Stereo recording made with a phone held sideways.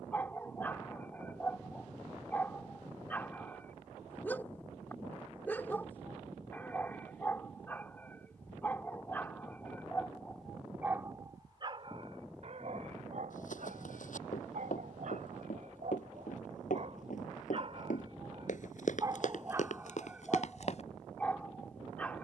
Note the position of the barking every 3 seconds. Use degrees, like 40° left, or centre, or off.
10° left, 10° left, 10° left, centre, 60° right, 60° right, 20° right, 10° left.